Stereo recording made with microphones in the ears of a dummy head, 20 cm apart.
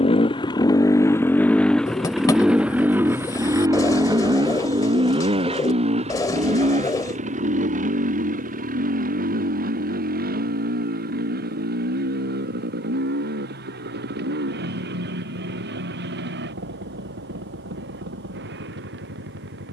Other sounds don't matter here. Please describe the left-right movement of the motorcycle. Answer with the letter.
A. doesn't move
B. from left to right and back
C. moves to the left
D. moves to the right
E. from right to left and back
D.